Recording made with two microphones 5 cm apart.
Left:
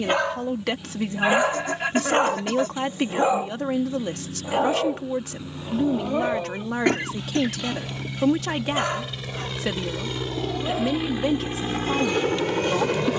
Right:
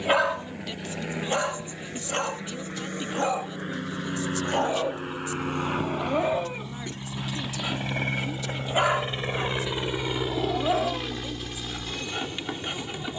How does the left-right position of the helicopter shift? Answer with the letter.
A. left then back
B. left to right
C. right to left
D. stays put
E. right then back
C.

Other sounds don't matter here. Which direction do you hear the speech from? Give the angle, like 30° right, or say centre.
60° left.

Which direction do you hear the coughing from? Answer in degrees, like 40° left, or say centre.
70° left.